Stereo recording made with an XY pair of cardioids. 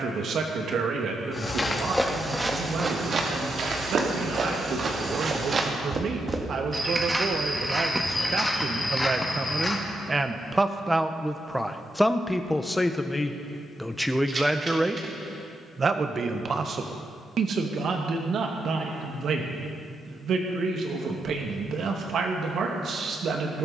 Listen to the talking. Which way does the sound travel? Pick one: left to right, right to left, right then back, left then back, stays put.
left then back.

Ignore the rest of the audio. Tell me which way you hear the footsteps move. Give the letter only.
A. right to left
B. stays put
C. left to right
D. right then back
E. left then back
D.